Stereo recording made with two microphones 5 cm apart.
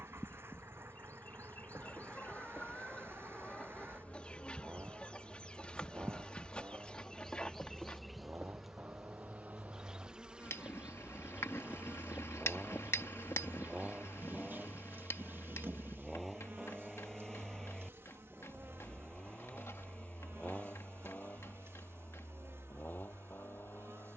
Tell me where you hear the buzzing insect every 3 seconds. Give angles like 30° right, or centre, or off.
40° left, 30° left, 10° left, 20° right, 40° right, 60° right, 60° right, 70° right.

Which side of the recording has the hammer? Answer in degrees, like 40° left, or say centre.
80° left.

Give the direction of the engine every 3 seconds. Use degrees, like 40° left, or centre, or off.
60° right, 50° right, 50° right, 40° right, 20° right, centre, 20° left, 40° left.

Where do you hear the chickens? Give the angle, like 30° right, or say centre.
20° left.